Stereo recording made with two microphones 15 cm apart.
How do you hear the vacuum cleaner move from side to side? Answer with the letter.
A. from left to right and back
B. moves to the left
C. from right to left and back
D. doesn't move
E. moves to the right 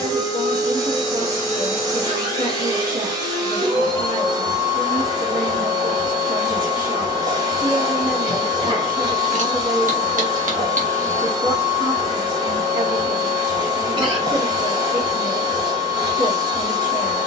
D.